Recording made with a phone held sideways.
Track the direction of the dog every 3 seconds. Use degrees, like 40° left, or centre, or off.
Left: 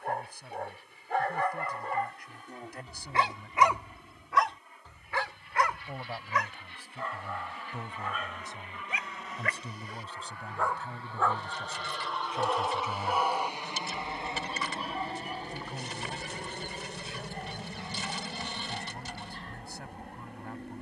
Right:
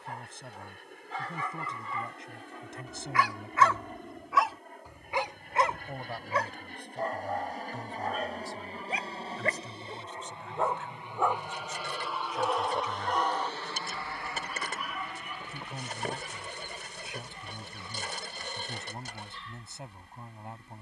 50° left, centre, 40° right, 30° right, 10° left, 40° left, 50° left.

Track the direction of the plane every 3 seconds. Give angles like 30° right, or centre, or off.
60° right, 60° right, 50° right, 20° right, 10° left, 40° left, 60° left.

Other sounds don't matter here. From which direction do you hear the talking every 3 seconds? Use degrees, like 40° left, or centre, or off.
20° right, 20° right, 10° left, 30° left, 20° left, 10° right, 20° right.